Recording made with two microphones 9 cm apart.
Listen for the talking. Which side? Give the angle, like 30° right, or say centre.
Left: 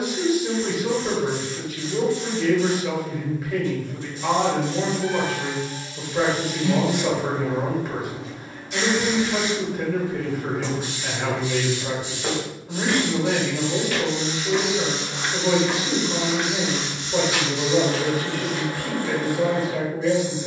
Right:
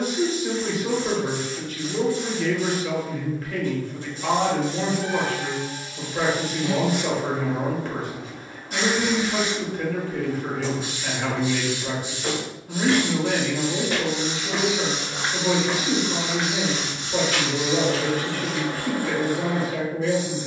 10° left.